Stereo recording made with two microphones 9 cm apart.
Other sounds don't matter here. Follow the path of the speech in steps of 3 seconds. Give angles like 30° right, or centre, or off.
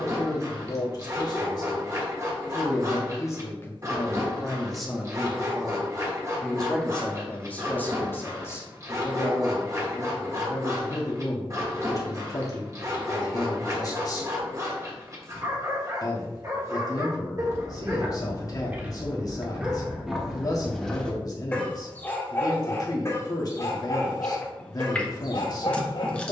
50° left, 10° left, 20° left, 40° left, 40° left, 40° left, 40° left, 40° left, 40° left.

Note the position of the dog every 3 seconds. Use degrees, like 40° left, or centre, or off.
30° right, 30° right, 30° right, 30° right, 30° right, 30° right, 10° right, 30° left, 50° left.